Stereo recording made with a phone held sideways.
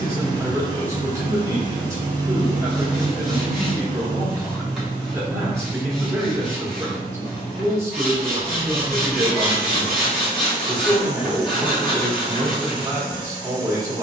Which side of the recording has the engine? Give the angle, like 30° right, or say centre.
30° right.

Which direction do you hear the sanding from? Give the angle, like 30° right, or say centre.
centre.